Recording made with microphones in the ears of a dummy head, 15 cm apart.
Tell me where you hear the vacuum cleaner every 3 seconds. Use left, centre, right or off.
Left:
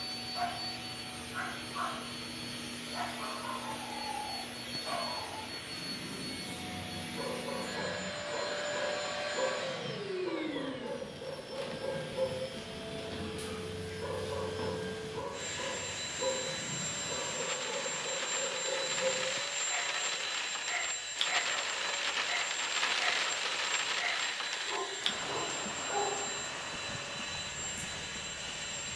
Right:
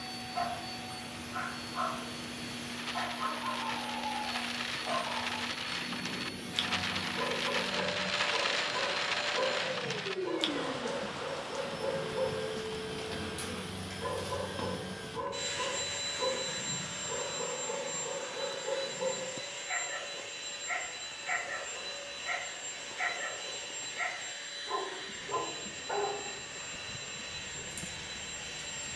left, left, left, left, right, centre, left, left, left, left.